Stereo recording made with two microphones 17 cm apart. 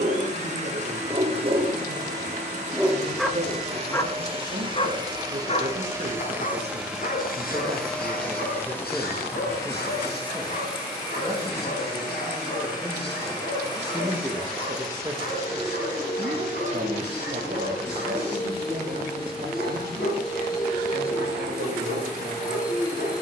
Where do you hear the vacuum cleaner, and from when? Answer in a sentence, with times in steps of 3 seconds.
You can hear the vacuum cleaner on the right from 0 s, in the centre from 6 s and on the left from 9 s.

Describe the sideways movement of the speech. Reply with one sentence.
In this clip you hear the speech move from right to left and back again.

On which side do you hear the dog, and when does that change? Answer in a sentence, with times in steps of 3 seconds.
In this clip you hear the dog on the right from 0 s and on the left from 3 s.